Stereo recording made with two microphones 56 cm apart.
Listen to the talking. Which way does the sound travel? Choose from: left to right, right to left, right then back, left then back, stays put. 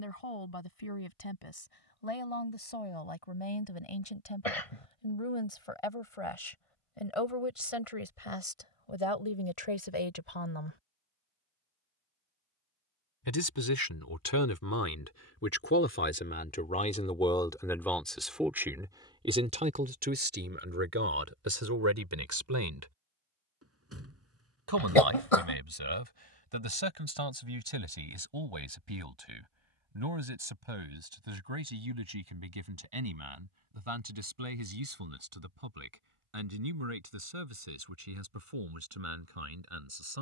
left to right.